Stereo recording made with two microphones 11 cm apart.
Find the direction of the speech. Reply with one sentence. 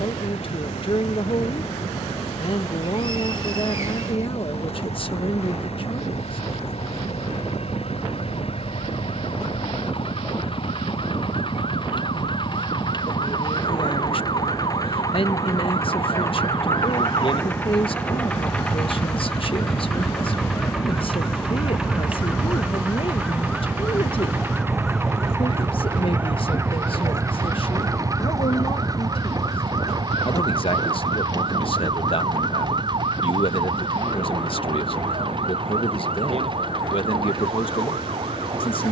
You can hear the speech on the left.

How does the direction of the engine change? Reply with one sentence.
In this clip you hear the engine move to the right.